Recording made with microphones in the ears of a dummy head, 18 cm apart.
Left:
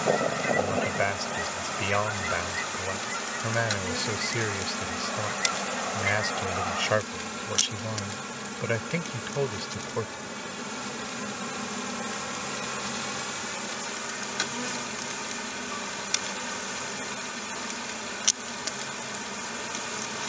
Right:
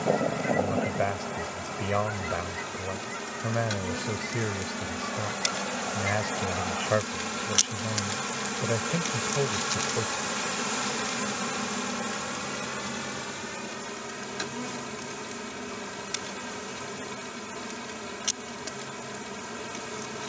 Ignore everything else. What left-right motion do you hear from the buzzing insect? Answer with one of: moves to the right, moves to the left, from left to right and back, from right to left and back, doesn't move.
from left to right and back.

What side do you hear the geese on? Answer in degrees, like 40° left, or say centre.
50° left.